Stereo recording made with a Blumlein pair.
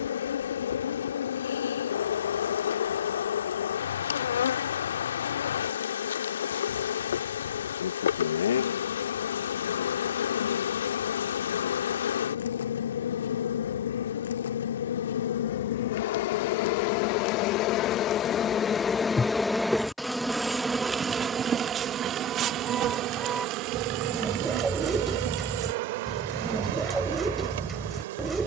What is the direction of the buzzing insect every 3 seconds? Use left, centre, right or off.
left, left, left, left, left, left, centre, right, right, right.